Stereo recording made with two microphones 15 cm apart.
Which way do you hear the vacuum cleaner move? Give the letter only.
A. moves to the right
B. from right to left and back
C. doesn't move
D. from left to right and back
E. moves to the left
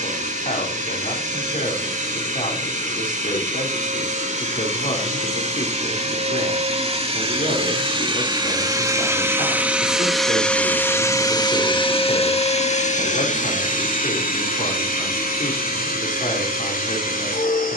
E.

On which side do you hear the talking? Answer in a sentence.
You can hear the talking on the left.